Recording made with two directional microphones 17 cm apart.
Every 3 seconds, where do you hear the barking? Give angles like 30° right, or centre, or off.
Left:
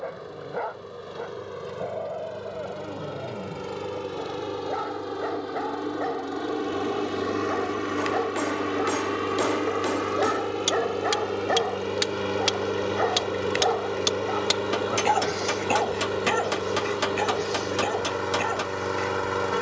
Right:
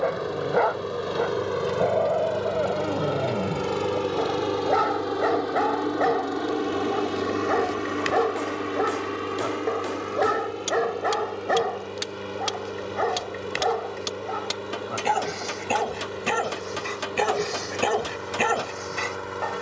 50° right, 50° right, 30° right, 20° right, centre, 10° right, 40° right.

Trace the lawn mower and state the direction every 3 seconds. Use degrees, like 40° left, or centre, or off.
50° right, 30° right, centre, 30° left, 40° left, 40° left, 40° left.